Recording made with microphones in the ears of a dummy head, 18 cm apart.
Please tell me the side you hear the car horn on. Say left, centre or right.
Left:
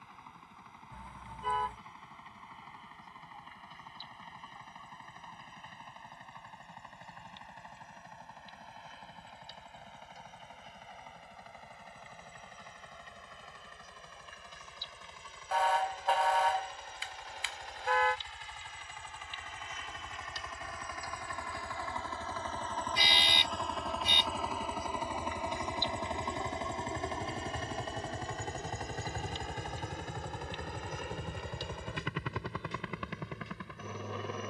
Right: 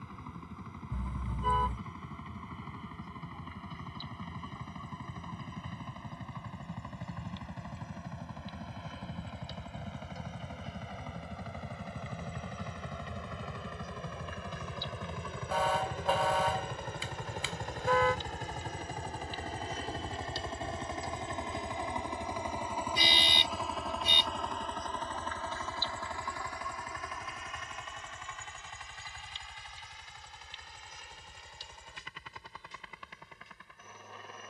right.